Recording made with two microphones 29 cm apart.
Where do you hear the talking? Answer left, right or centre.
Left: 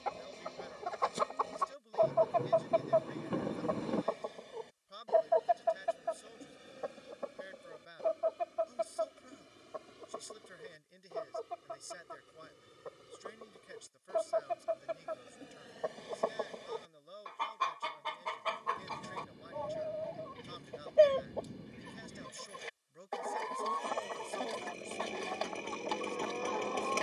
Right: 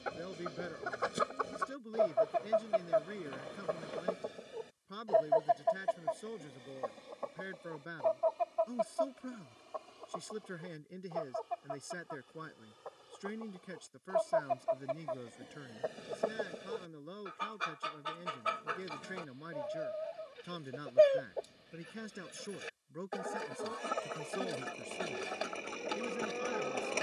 right.